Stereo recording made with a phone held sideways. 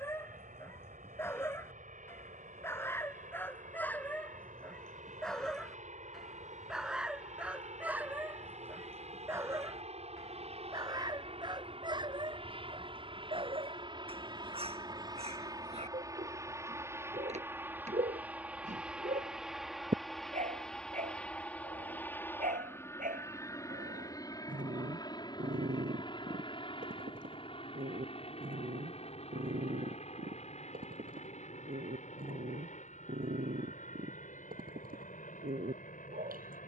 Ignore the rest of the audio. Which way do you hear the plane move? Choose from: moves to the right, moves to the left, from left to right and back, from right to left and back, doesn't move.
moves to the left.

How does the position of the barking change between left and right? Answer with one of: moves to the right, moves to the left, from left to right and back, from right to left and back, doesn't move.
moves to the right.